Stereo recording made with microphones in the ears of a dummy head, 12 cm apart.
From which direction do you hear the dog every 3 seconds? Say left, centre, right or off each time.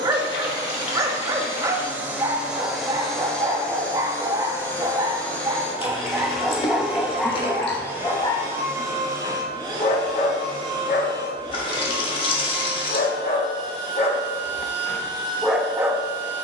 right, right, centre, left, left, centre.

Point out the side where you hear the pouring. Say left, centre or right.
left.